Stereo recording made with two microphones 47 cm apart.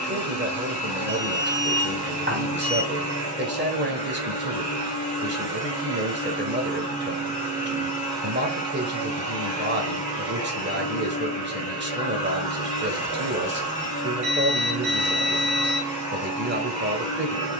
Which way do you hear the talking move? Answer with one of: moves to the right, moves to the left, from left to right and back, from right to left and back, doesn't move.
doesn't move.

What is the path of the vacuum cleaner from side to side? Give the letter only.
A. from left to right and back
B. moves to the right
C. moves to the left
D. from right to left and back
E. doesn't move
E.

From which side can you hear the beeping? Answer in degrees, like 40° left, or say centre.
20° right.